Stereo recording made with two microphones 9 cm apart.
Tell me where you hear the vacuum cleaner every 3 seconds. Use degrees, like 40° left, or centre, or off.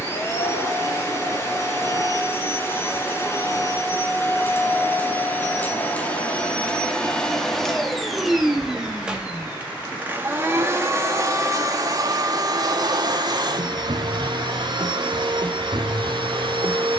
30° left, 30° left, 10° left, 20° right, 50° right, 70° right.